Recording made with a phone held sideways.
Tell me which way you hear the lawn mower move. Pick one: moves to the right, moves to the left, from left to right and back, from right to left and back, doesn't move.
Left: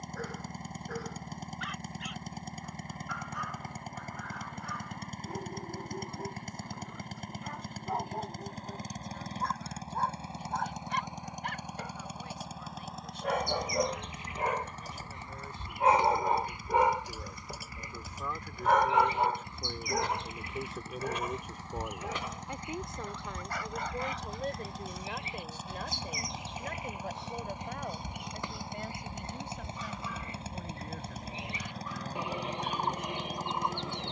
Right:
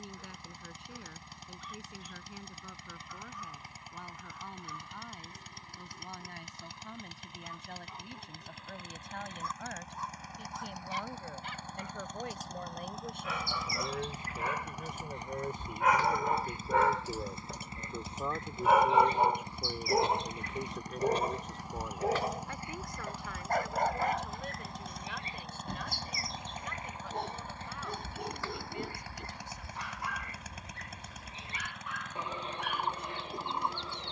from left to right and back.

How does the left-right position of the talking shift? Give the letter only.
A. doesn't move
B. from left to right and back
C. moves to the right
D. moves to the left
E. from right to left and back
D.